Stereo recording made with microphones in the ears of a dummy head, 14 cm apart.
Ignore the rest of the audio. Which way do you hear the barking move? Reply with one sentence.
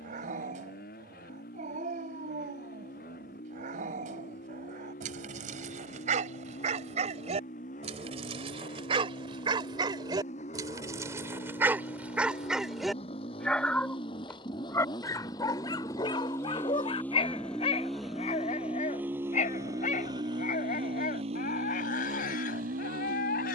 You can hear the barking move to the left.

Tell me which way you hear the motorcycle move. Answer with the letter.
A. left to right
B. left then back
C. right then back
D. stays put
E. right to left
A.